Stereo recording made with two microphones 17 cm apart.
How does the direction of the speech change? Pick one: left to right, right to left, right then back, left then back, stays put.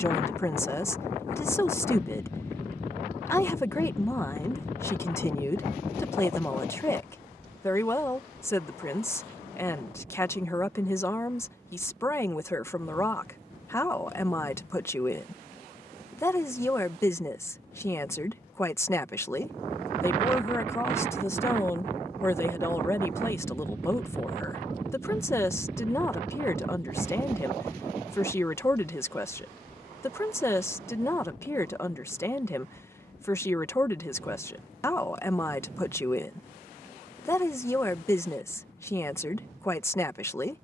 stays put.